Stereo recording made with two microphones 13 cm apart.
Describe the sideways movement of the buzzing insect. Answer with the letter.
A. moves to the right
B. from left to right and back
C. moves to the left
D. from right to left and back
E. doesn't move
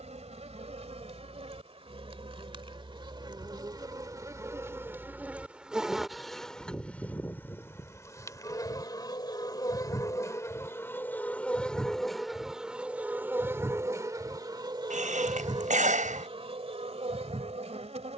D.